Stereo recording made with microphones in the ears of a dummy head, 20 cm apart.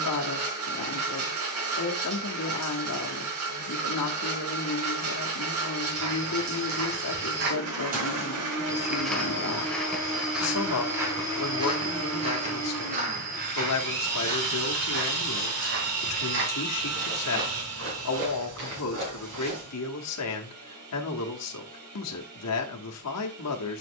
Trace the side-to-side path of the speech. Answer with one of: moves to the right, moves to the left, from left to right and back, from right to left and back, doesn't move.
doesn't move.